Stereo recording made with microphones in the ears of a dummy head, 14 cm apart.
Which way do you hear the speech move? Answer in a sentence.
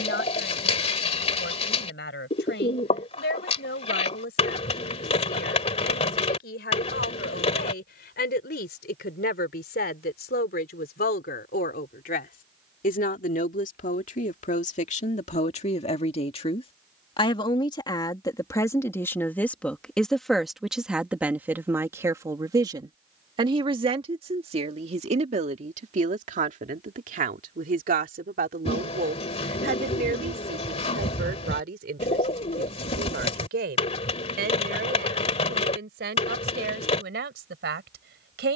You can hear the speech move from left to right.